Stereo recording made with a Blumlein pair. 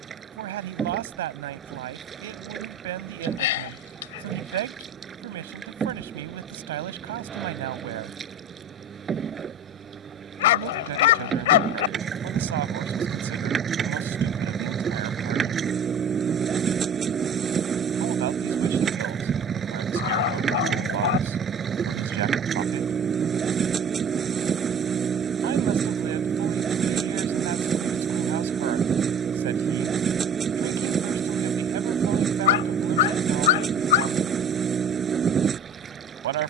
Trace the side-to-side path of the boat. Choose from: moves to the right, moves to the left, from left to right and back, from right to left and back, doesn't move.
doesn't move.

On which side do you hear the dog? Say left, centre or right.
left.